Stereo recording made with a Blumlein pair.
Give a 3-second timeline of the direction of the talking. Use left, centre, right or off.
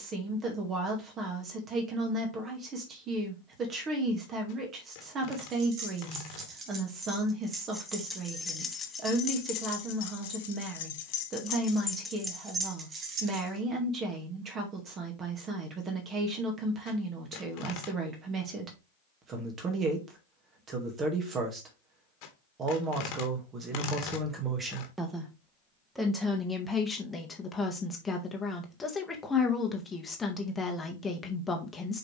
right, right, right, right, right, right, right, right, centre, centre, centre.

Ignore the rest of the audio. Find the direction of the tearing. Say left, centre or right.
left.